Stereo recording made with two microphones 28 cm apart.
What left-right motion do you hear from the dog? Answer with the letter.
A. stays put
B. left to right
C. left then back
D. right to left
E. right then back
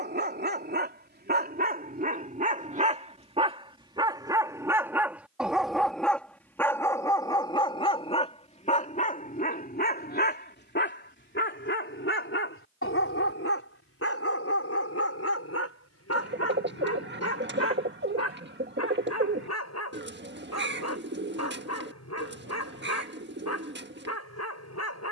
D.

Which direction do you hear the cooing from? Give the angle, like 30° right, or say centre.
40° right.